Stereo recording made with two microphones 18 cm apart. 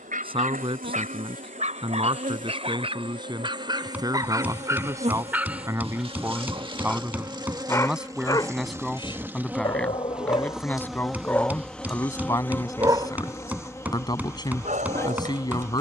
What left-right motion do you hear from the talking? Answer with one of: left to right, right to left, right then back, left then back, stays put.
right to left.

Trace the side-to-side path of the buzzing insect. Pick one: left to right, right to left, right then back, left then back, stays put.
right to left.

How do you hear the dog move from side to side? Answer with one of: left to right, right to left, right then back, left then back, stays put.
left then back.